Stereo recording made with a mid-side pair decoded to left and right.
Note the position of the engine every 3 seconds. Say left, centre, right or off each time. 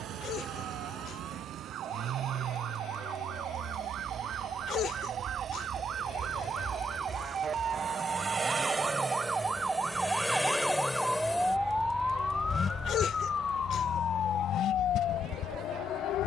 right, right, right, centre, left, left.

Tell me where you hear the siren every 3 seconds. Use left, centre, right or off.
right, right, right, centre, left, left.